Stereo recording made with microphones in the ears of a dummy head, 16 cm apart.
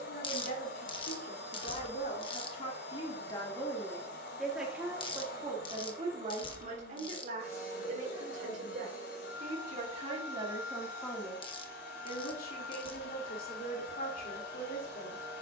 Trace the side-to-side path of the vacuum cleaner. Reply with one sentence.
In this clip you hear the vacuum cleaner stay put.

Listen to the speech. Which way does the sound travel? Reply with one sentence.
In this clip you hear the speech go right and come back.